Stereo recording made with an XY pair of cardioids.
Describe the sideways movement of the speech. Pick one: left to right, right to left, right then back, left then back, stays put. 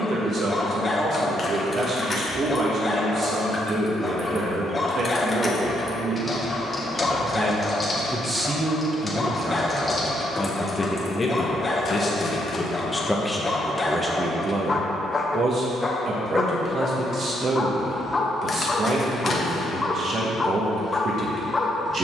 left then back.